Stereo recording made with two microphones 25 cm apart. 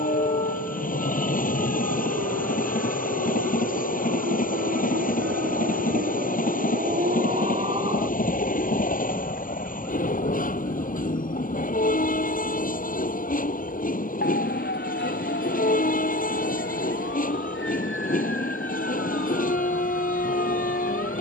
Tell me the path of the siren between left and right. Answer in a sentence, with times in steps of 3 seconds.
In this clip you hear the siren on the right from 0 s, in the centre from 9 s and on the left from 12 s.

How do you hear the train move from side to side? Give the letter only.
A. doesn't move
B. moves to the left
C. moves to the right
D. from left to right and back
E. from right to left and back
A.